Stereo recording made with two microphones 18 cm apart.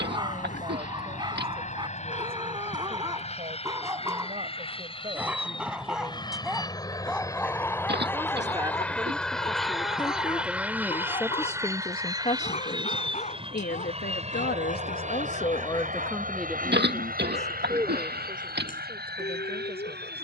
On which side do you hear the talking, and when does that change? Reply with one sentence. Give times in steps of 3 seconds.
You can hear the talking on the right from 0 s, in the centre from 9 s, on the left from 12 s, in the centre from 15 s and on the right from 18 s.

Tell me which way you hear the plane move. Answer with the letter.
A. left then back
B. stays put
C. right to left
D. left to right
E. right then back
D.